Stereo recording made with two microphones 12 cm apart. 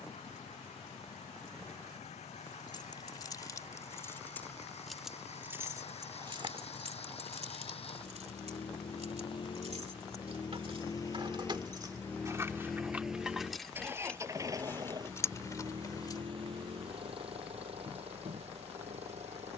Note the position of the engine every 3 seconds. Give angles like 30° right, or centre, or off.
70° left, 70° left, 60° left, 40° left, 10° right, 50° right, 60° right.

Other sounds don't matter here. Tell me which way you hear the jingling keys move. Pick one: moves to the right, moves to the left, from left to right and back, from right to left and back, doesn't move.
from left to right and back.